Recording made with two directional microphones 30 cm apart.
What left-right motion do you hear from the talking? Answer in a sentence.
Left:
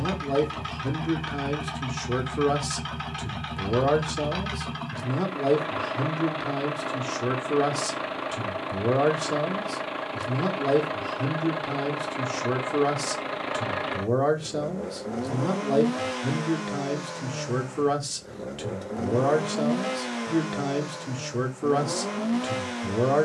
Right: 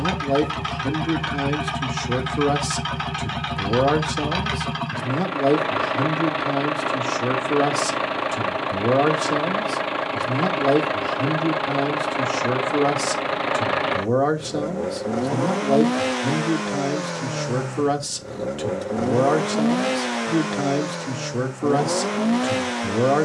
You can hear the talking stay in one place.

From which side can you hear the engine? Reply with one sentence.
You can hear the engine on the right.